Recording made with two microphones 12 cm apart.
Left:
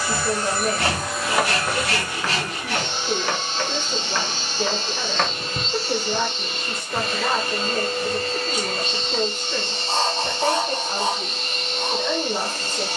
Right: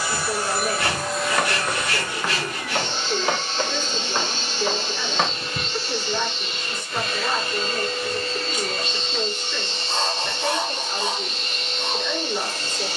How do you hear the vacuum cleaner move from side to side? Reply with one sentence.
You can hear the vacuum cleaner move to the left.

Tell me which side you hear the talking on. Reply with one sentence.
You can hear the talking on the left.